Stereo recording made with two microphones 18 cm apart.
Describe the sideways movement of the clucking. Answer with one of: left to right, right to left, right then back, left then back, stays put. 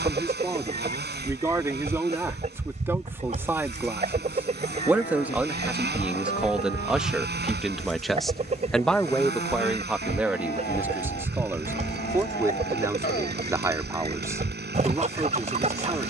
stays put.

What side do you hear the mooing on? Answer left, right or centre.
left.